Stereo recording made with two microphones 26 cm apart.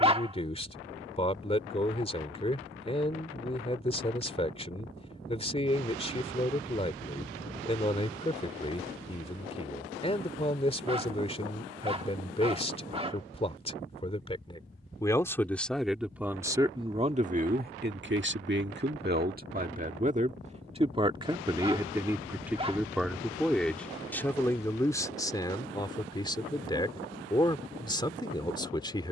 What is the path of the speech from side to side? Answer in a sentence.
In this clip you hear the speech move from left to right and back again.